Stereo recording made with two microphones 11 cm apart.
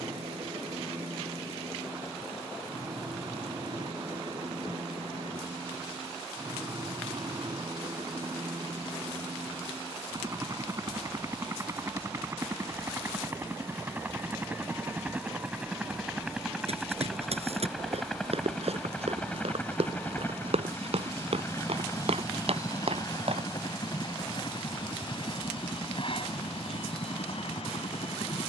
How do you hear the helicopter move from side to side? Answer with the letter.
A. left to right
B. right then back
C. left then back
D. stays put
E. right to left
E.